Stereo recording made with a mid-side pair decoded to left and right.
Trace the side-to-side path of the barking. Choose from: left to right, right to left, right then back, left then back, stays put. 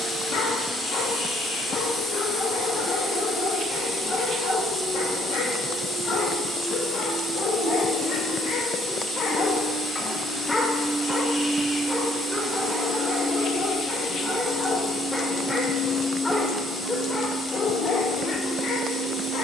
right then back.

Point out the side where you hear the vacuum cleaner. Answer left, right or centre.
centre.